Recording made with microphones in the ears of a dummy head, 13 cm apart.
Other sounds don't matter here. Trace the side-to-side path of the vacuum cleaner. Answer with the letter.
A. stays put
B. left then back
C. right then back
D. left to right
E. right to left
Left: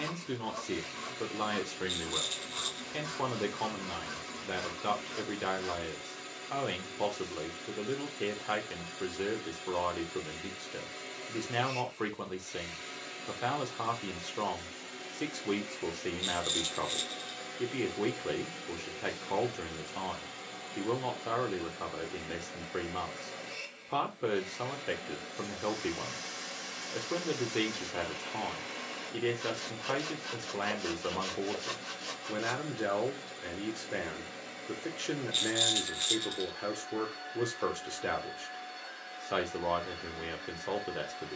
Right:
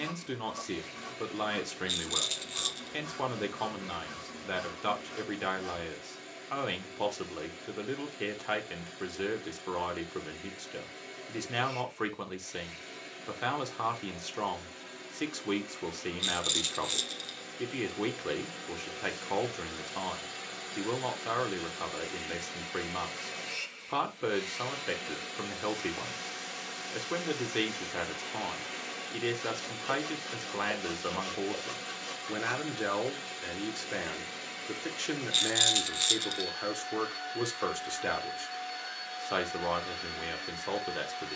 D.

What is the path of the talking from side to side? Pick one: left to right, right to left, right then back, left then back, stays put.
stays put.